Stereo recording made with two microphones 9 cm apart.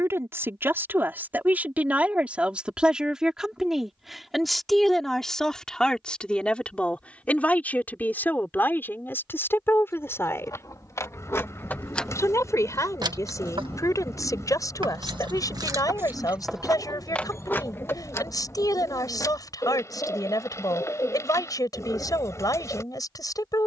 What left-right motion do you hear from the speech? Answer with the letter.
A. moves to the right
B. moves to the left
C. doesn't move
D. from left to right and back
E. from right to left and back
B.